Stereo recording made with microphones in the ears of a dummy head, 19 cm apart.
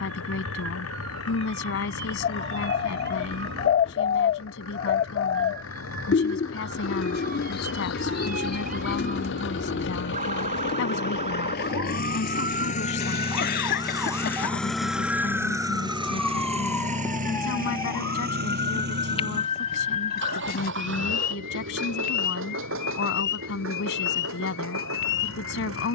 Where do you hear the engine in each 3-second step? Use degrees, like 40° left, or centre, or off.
80° left, 80° left, 70° left, 60° left, 20° left, 30° right, 60° right, 70° right, 70° right.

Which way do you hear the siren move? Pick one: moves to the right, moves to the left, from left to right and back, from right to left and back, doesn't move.
moves to the left.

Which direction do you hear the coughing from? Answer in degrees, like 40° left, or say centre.
50° left.